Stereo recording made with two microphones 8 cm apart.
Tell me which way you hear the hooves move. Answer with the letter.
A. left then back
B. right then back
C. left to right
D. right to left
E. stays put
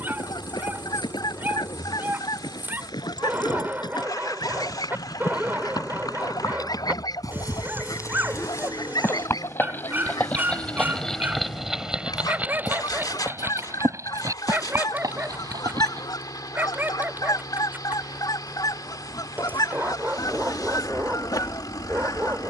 C.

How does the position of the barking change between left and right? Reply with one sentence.
You can hear the barking stay put.